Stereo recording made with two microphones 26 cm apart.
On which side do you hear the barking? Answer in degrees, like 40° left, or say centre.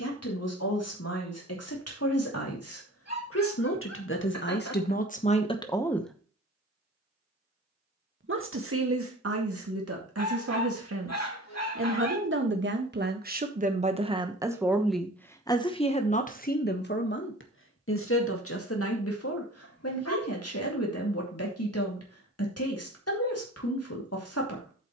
80° left.